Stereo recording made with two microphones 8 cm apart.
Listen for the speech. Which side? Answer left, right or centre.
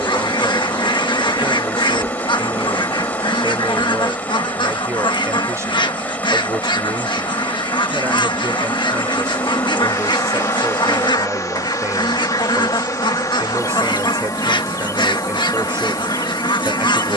right.